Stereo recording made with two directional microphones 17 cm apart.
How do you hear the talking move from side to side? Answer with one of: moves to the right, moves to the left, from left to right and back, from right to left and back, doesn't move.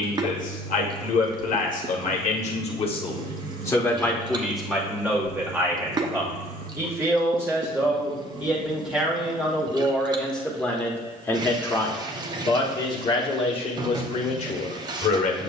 from left to right and back.